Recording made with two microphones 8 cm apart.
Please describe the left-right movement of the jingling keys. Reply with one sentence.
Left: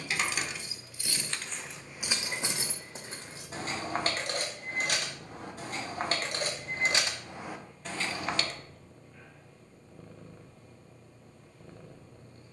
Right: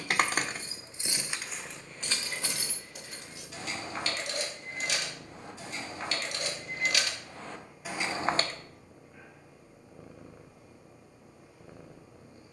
You can hear the jingling keys move from right to left and back again.